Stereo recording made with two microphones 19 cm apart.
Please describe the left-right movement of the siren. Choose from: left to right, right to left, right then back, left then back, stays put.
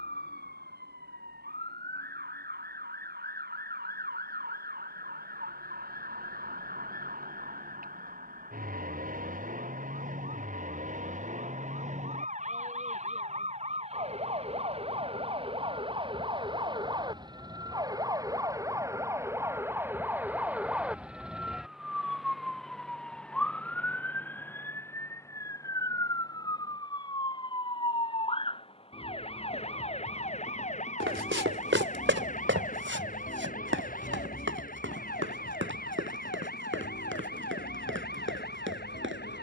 right to left.